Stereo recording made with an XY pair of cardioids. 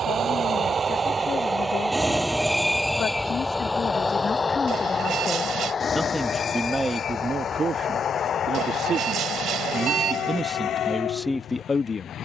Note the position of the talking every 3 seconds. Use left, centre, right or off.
left, left, right, centre.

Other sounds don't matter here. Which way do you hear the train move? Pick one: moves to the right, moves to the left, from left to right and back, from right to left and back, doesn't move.
moves to the left.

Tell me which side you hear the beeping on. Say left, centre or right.
right.